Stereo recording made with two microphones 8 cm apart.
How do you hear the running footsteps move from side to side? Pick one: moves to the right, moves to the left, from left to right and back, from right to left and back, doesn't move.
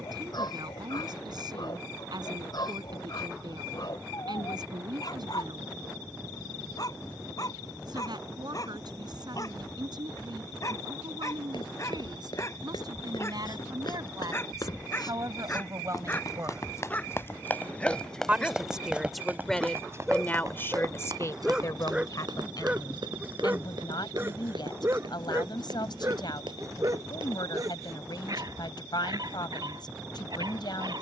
moves to the right.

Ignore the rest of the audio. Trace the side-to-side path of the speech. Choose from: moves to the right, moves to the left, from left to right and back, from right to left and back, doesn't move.
moves to the left.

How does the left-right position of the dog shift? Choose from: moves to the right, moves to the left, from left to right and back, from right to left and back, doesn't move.
moves to the right.